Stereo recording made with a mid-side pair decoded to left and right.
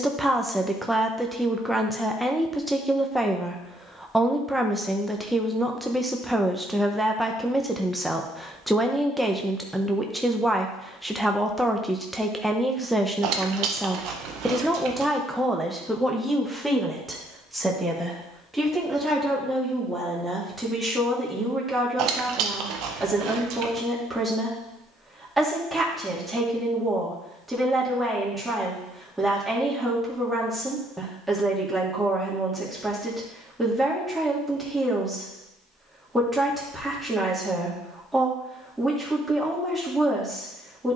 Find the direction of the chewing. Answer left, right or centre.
right.